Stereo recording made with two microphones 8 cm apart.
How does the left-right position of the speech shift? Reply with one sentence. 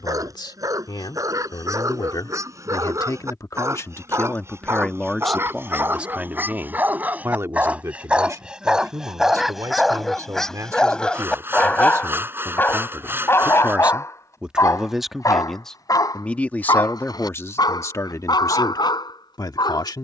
In this clip you hear the speech go right and come back.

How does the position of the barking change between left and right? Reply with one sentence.
You can hear the barking go from the right side to the left.